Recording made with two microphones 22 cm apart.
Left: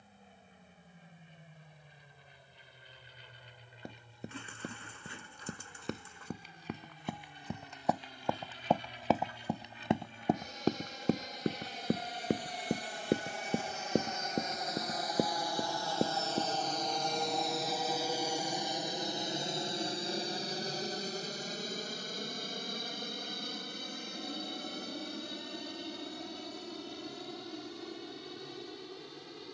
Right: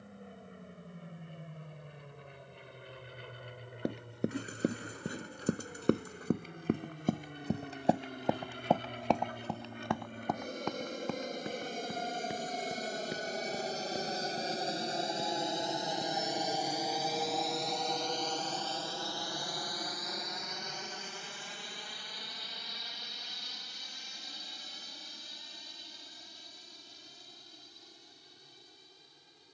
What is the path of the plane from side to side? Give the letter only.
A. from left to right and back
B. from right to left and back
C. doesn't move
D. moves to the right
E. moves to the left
E.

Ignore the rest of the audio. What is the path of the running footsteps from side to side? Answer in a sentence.
You can hear the running footsteps move to the left.